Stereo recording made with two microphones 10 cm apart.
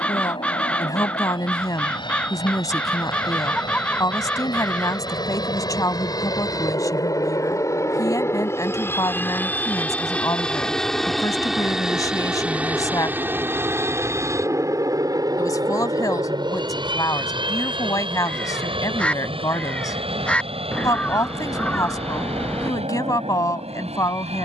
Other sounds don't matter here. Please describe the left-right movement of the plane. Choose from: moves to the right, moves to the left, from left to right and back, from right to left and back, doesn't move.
moves to the right.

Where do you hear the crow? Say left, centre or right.
centre.